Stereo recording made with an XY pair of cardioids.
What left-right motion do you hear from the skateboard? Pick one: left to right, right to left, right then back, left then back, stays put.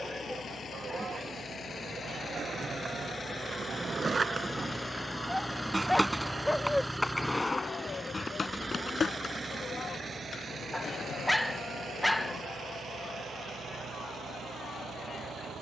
right to left.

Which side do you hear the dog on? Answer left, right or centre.
centre.